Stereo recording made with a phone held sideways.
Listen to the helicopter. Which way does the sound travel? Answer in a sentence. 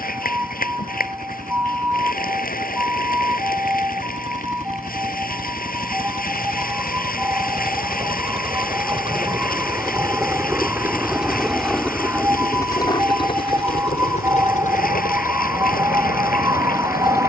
You can hear the helicopter travel towards the left.